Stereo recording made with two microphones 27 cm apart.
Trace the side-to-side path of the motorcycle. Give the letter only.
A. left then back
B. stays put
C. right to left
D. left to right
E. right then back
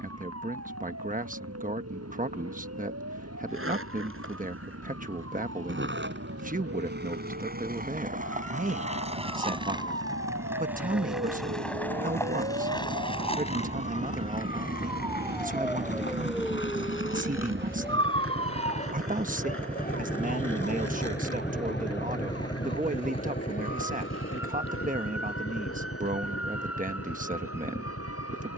C.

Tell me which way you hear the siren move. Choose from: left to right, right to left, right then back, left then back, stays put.
right to left.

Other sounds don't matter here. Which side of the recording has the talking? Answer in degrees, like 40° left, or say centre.
30° right.